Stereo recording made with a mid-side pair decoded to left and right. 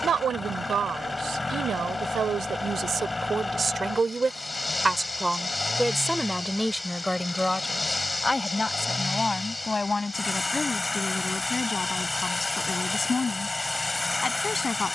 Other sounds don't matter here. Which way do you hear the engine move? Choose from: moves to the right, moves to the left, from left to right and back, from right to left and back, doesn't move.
doesn't move.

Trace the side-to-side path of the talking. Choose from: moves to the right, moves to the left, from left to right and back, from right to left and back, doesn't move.
moves to the left.